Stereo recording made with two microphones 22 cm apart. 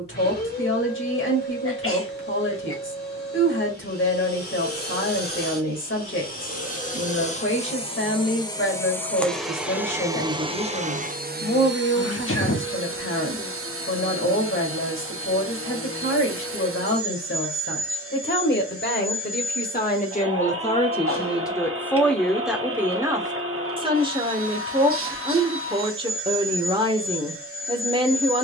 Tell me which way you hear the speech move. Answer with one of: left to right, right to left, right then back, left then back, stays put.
left to right.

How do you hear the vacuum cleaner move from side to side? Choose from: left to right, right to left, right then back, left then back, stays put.
left to right.